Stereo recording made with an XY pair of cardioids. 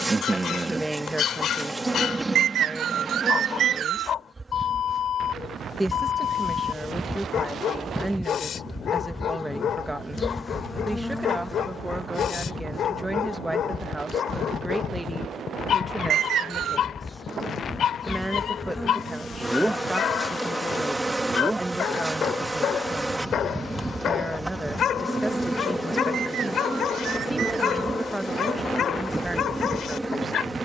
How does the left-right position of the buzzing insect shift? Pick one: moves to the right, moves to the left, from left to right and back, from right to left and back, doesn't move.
from right to left and back.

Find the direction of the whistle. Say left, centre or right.
right.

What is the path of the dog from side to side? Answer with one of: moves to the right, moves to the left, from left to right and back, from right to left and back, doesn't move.
doesn't move.